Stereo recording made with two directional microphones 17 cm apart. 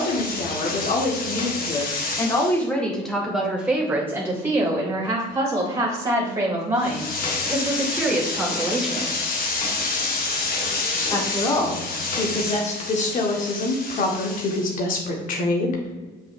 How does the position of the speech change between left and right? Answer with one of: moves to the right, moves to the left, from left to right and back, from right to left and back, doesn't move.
from left to right and back.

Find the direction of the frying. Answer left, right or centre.
left.